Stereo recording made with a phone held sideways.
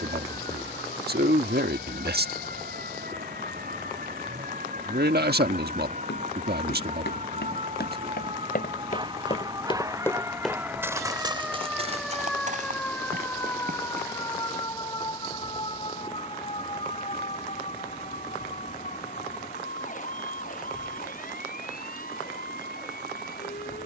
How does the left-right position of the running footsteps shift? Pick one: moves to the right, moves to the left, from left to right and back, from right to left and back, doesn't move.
moves to the right.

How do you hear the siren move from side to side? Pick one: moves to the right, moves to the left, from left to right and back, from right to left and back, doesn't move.
moves to the left.